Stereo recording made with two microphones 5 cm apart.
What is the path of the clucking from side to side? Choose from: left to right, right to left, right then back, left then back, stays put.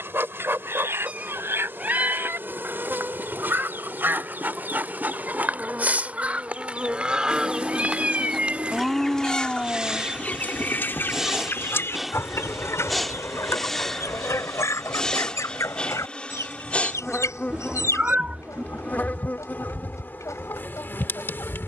right to left.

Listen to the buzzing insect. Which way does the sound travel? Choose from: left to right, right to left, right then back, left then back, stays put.
right to left.